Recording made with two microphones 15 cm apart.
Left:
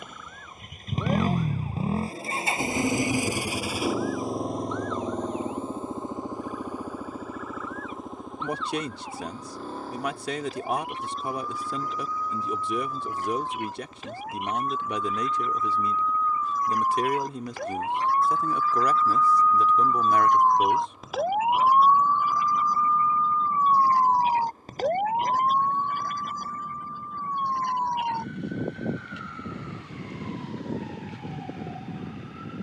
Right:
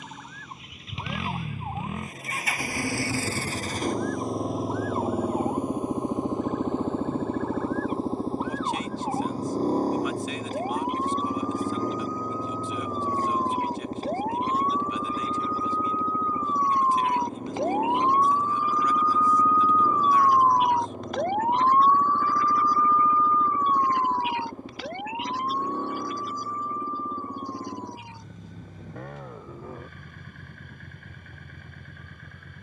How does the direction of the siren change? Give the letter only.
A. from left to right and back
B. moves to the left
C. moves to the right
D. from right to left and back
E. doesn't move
B.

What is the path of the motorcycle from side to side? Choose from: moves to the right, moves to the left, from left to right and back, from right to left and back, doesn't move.
moves to the right.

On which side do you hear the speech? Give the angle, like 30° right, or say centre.
70° left.